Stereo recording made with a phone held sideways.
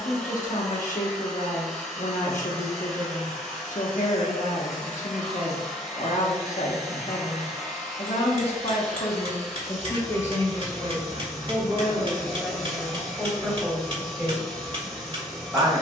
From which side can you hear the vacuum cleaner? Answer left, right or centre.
centre.